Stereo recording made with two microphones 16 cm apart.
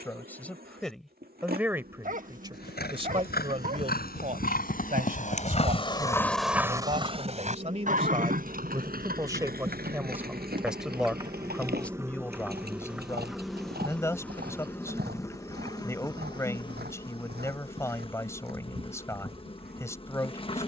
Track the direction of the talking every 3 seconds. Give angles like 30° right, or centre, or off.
10° right, 50° right, 40° right, 10° right, 20° left, 20° left, 20° left.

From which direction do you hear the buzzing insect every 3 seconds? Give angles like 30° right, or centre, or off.
70° right, 70° right, 50° right, 30° right, centre, 30° left, 30° left.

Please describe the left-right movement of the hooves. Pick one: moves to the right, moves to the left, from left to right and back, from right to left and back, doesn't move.
moves to the right.